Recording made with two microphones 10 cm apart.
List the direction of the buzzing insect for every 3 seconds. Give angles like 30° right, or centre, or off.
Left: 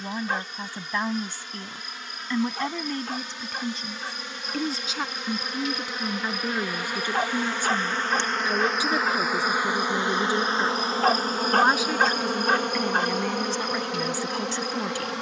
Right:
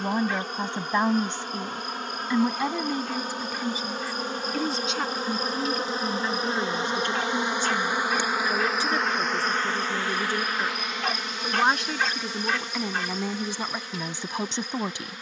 50° right, 40° right, 20° right, 30° left, 60° left.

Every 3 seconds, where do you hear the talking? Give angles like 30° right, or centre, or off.
20° right, centre, 10° left, 10° left, 10° right.